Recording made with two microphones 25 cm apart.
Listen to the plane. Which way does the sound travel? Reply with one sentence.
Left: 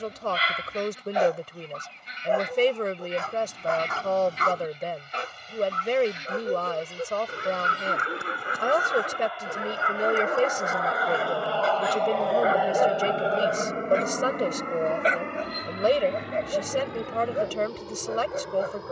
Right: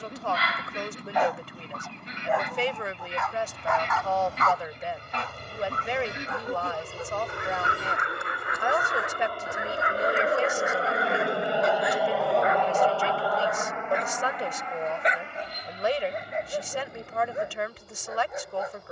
You can hear the plane move to the left.